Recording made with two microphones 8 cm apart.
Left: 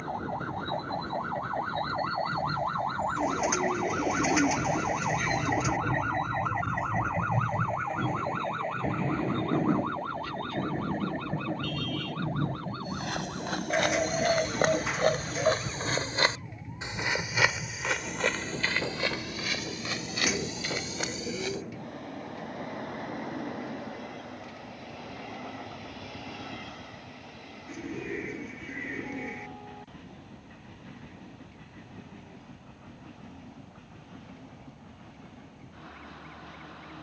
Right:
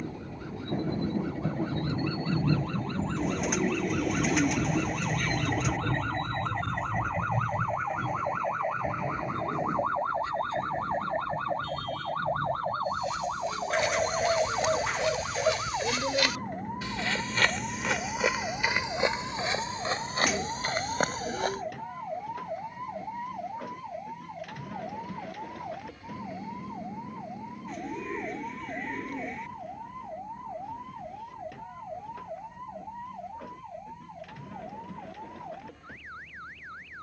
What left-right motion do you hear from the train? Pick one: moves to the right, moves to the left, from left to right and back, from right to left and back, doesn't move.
moves to the left.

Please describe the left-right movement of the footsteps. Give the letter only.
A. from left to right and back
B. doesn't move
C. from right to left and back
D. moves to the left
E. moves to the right
E.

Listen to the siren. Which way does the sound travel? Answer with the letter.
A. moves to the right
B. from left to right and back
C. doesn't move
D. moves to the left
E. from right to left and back
A.